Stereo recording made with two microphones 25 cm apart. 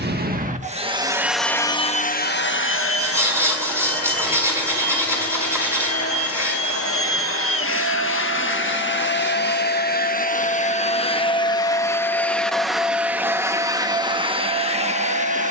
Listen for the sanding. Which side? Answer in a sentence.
You can hear the sanding in the centre.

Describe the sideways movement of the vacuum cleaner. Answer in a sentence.
You can hear the vacuum cleaner go left and come back.